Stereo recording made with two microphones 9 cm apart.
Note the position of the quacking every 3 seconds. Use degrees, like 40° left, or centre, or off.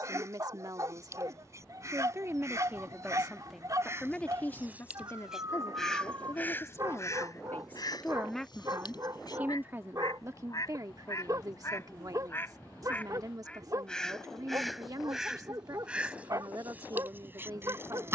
30° right, 20° right, 40° left, 40° left, 20° left, 20° right.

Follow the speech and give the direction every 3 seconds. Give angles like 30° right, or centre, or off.
40° right, 20° left, 20° left, 40° right, 40° right, 40° right.